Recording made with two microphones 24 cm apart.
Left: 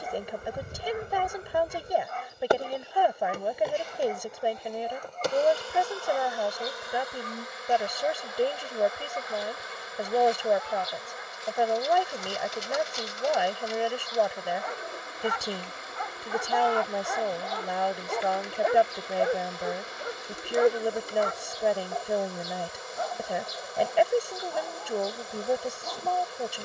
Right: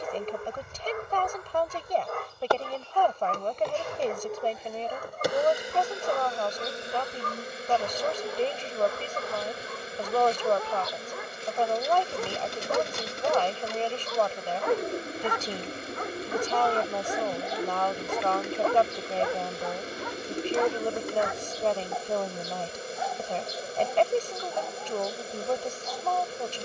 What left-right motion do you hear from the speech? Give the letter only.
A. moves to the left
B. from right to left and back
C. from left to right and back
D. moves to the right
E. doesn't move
E.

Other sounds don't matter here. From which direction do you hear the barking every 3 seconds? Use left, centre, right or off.
right, right, right, right, right, right, left, left, left.